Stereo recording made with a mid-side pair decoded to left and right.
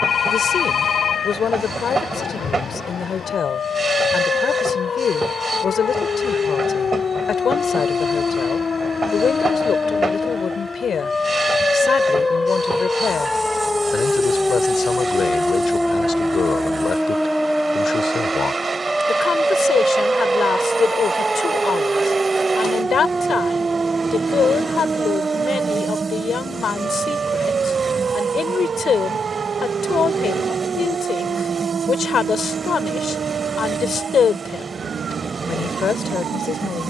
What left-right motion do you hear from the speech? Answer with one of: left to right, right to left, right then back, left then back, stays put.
stays put.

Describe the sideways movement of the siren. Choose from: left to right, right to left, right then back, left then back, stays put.
left to right.